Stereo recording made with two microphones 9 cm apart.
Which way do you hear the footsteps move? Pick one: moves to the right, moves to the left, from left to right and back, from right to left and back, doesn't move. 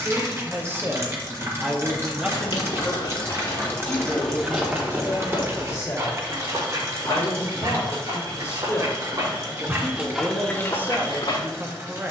from left to right and back.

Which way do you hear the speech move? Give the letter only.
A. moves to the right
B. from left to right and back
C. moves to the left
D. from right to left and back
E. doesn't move
D.